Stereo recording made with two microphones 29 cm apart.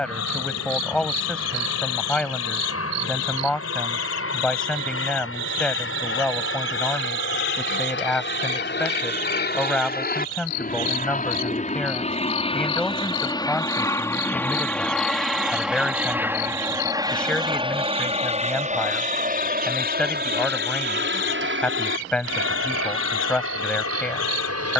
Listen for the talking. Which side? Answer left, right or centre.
centre.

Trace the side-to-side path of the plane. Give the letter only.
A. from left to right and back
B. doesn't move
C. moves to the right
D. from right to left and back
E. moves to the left
C.